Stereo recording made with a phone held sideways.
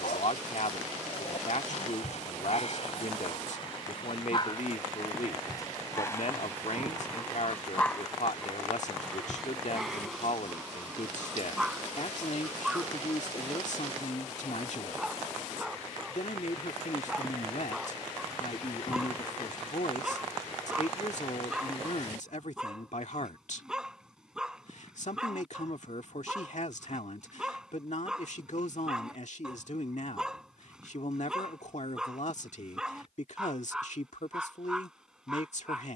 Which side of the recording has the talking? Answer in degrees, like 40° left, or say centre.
60° left.